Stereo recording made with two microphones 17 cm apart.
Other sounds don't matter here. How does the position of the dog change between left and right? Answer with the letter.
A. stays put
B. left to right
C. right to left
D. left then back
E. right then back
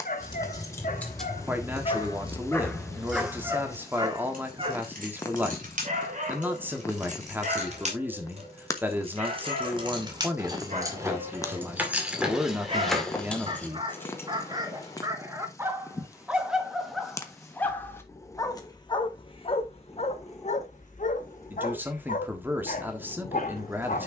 E.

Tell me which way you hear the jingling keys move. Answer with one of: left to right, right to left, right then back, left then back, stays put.
right then back.